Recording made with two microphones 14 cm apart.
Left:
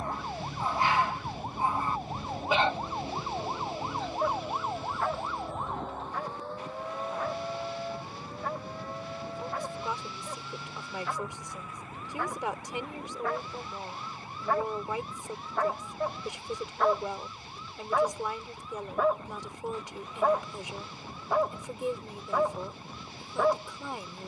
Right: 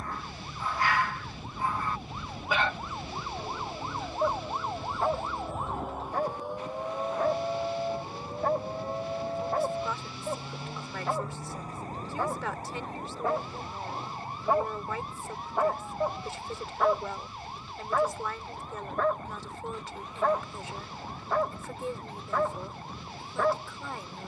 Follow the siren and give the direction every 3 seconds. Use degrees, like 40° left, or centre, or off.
50° left, 10° left, 20° right, 30° right, 40° right, 50° right, 50° right, 50° right.